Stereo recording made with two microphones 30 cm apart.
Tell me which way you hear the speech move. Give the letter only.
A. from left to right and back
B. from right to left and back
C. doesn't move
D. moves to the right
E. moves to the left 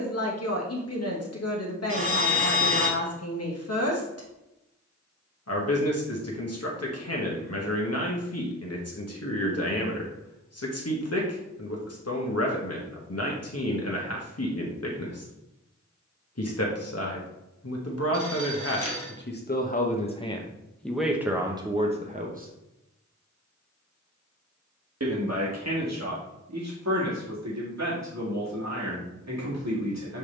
D.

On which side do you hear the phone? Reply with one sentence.
In this clip you hear the phone on the left.